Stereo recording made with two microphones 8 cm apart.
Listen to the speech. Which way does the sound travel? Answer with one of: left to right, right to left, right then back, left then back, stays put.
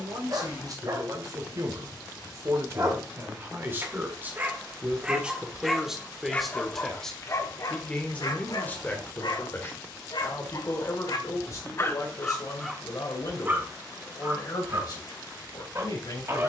right to left.